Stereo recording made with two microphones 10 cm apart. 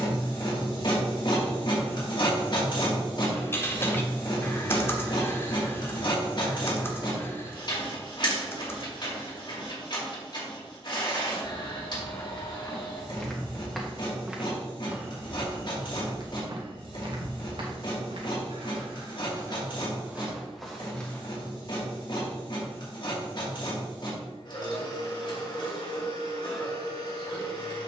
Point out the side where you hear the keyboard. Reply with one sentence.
In this clip you hear the keyboard on the left.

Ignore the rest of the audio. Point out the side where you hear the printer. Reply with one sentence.
In this clip you hear the printer on the left.